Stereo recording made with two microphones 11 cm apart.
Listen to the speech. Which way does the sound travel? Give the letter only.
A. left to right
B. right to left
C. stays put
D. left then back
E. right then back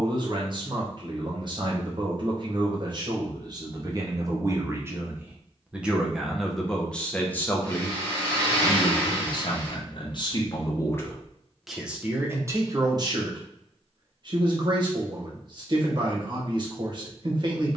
D.